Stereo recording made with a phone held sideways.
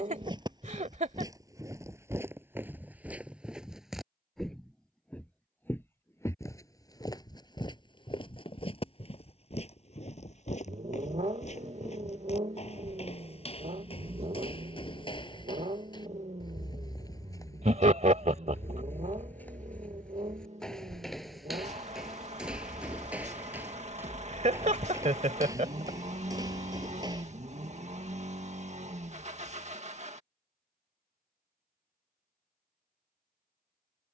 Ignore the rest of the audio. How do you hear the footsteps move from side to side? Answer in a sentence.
You can hear the footsteps go left and come back.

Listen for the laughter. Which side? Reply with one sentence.
In this clip you hear the laughter on the right.